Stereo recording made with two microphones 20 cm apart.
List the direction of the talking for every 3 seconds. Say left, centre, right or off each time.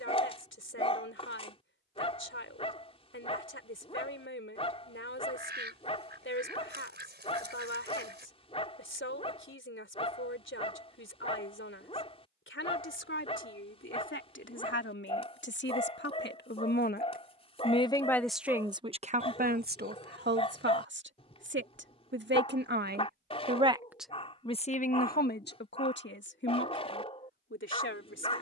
left, left, left, left, left, left, right, right, left, left.